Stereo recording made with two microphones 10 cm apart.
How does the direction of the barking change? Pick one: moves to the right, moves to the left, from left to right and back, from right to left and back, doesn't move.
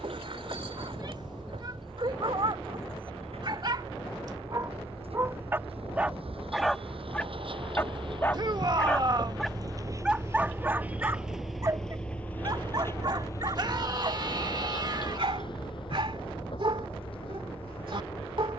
from right to left and back.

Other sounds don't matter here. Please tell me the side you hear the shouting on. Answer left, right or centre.
right.